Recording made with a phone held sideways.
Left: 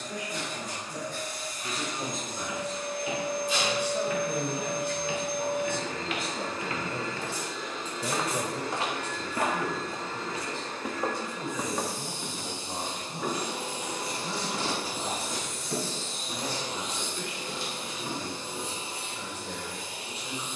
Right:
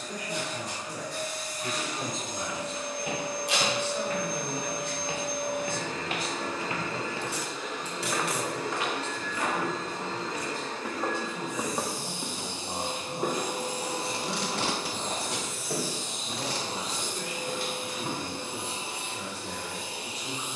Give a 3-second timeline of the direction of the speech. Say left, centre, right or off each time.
right, left, left, centre, right, right, right.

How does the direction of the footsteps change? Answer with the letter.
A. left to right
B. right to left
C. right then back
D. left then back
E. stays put
D.